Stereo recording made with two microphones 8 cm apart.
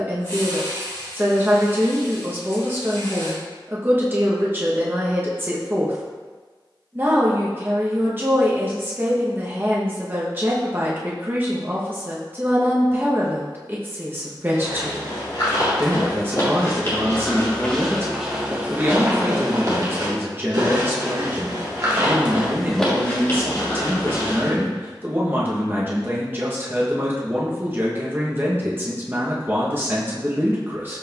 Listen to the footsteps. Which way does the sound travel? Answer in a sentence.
In this clip you hear the footsteps move from left to right and back again.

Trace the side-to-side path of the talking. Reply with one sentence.
In this clip you hear the talking stay in one place.